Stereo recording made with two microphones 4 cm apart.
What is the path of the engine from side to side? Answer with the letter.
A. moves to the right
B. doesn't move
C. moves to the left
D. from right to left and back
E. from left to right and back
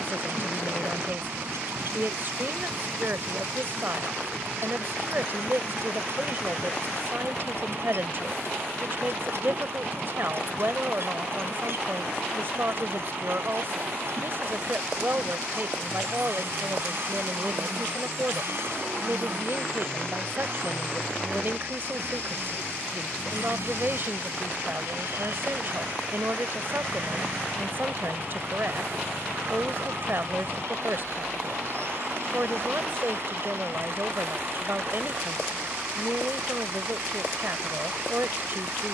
B.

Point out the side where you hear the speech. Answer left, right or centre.
right.